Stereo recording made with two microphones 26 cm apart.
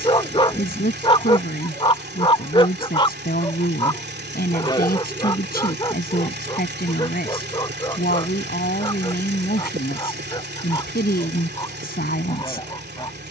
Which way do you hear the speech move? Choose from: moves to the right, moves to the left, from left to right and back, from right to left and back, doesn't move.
doesn't move.